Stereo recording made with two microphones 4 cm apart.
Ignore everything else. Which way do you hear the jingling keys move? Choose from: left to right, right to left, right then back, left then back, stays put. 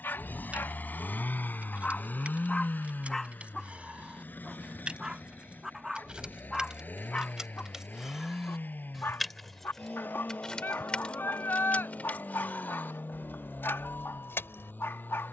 right to left.